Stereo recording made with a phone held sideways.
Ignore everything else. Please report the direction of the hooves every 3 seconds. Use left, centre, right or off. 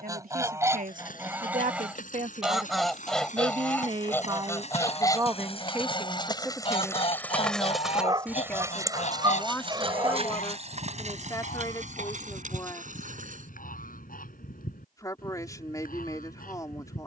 left, left, centre, right, right, off.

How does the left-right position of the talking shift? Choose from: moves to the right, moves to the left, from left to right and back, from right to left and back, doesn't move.
moves to the left.